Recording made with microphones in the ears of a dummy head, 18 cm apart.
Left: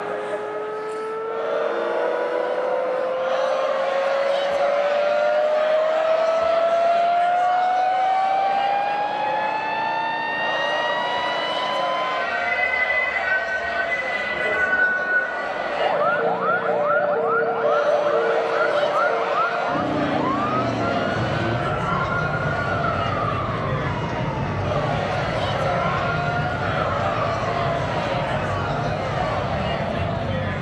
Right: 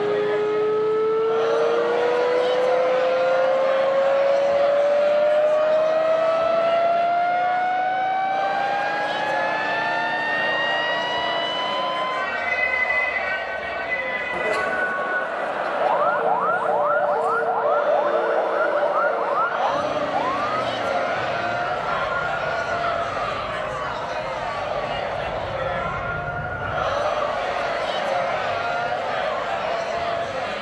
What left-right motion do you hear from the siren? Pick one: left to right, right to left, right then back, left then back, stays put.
right to left.